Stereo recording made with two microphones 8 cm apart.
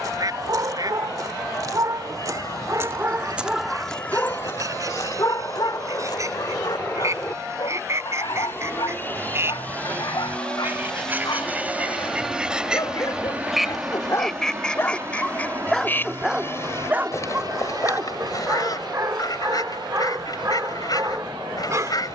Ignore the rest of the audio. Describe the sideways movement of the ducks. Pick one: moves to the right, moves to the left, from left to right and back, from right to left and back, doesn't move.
moves to the left.